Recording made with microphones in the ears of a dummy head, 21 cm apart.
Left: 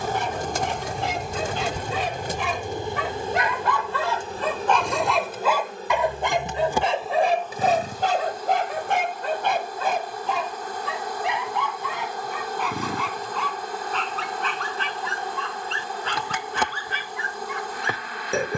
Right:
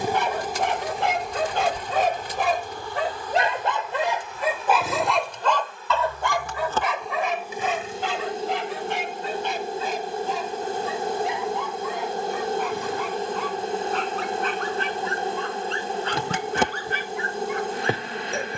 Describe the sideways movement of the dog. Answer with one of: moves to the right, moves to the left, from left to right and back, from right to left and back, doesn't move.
moves to the left.